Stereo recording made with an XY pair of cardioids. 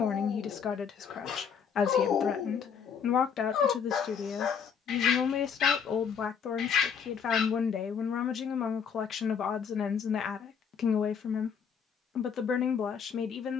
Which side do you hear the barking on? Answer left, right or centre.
left.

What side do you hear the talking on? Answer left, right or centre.
left.